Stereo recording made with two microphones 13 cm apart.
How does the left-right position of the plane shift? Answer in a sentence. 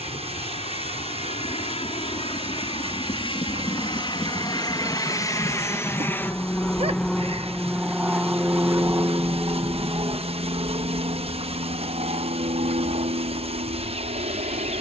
You can hear the plane travel towards the right.